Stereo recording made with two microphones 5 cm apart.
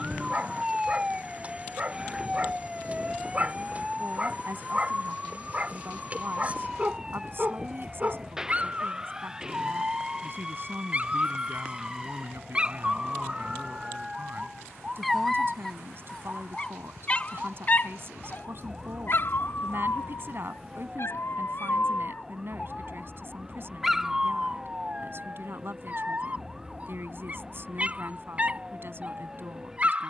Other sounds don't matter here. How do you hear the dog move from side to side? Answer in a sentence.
You can hear the dog go left and come back.